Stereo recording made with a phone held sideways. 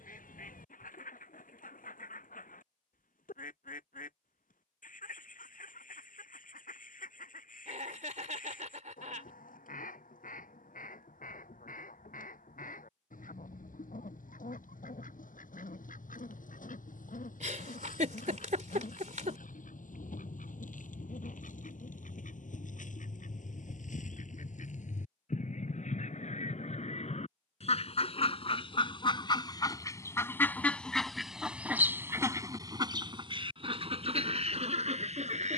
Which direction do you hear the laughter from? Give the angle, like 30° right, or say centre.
60° right.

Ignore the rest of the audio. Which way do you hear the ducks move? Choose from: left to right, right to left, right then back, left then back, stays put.
left to right.